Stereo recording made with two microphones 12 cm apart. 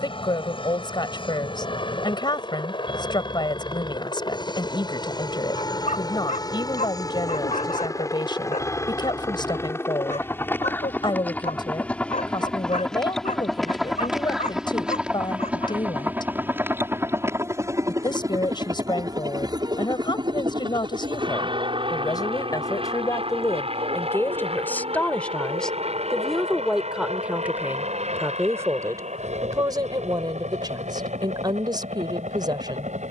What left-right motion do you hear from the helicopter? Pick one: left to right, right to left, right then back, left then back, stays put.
left to right.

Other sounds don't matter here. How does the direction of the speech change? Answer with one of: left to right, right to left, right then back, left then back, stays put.
left to right.